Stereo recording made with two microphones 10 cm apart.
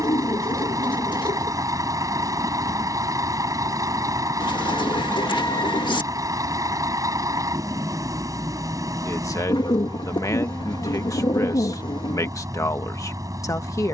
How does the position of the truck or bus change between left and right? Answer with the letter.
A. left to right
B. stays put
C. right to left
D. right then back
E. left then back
B.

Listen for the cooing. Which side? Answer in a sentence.
In this clip you hear the cooing on the left.